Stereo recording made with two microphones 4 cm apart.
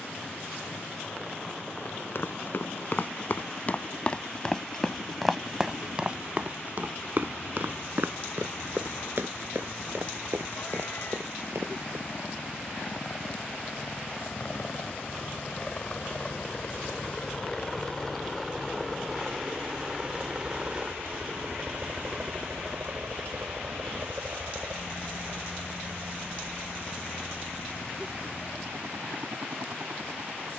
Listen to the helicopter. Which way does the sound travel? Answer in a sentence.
In this clip you hear the helicopter go from the left side to the right.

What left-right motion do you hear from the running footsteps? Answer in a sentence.
You can hear the running footsteps go from the left side to the right.